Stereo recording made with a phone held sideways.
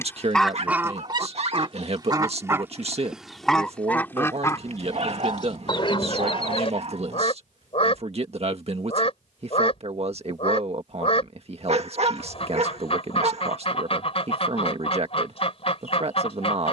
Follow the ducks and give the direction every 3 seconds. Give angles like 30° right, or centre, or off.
20° right, 20° left, 40° left, 40° left, 40° left, 40° left.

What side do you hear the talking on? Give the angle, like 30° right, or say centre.
50° right.